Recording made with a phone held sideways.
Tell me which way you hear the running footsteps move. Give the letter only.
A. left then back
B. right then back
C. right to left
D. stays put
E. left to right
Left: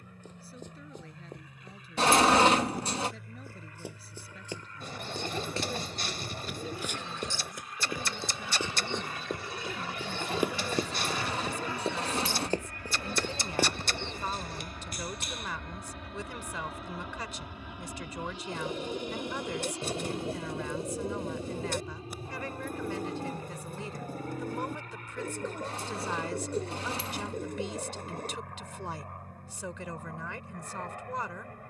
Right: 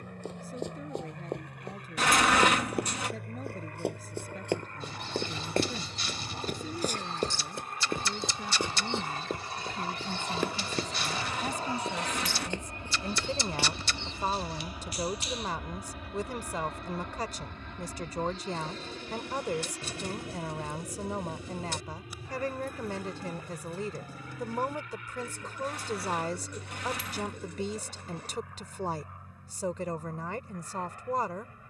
C.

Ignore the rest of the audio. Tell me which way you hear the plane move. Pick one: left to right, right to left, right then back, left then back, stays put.
right to left.